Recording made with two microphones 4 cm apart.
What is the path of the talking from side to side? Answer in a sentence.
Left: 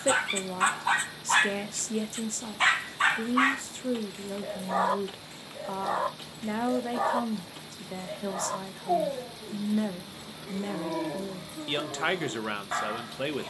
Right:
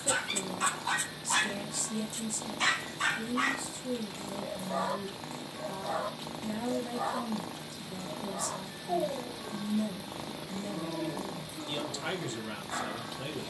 You can hear the talking stay put.